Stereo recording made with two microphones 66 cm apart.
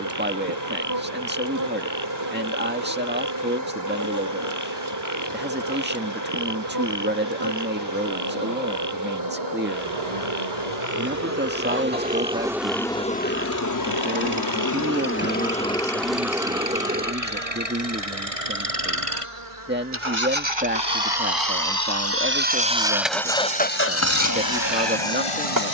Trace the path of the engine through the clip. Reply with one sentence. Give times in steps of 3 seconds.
In this clip you hear the engine on the right from 0 s, in the centre from 21 s and on the left from 24 s.